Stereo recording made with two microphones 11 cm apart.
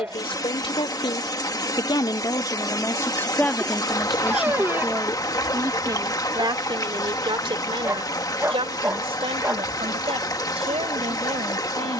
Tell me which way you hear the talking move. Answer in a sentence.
In this clip you hear the talking move from left to right.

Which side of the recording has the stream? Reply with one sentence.
In this clip you hear the stream on the left.